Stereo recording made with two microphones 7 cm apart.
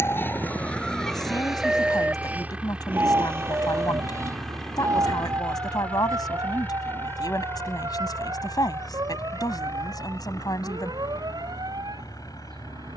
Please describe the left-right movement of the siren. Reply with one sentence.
You can hear the siren move from left to right.